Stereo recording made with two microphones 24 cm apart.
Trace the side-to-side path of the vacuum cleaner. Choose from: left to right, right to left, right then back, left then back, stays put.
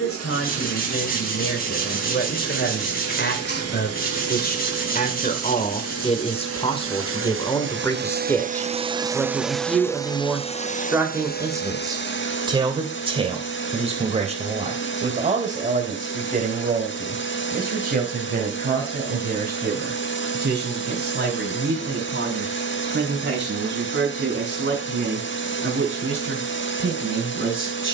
right to left.